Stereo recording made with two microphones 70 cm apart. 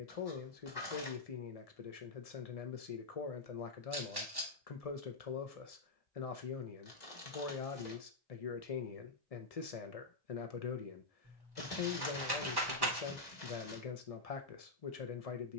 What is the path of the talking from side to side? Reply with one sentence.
You can hear the talking stay in one place.